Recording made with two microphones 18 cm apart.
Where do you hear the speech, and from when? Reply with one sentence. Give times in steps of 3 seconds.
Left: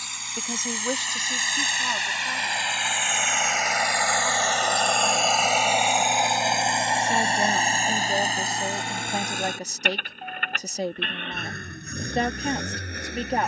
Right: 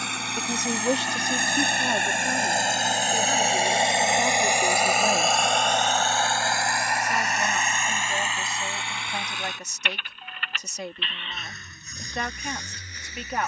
In this clip you hear the speech on the right from 0 s and on the left from 6 s.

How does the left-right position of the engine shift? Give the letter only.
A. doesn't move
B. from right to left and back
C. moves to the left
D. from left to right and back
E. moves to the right
C.